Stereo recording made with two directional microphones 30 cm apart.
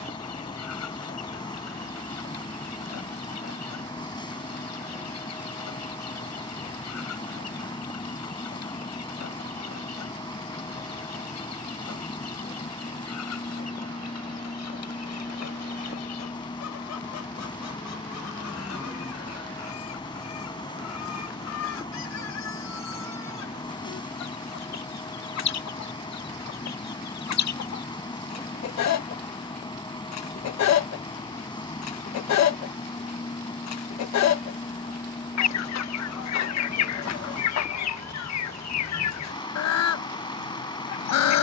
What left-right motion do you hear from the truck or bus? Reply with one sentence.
You can hear the truck or bus stay put.